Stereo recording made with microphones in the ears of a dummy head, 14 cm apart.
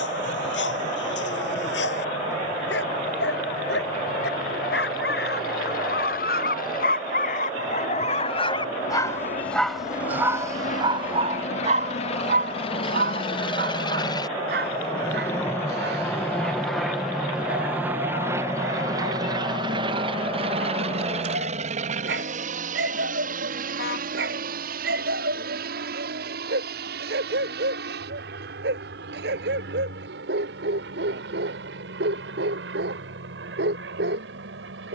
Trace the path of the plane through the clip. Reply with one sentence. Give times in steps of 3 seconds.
You can hear the plane on the left from 0 s, in the centre from 15 s and on the right from 18 s.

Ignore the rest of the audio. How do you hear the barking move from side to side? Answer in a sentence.
You can hear the barking move from left to right.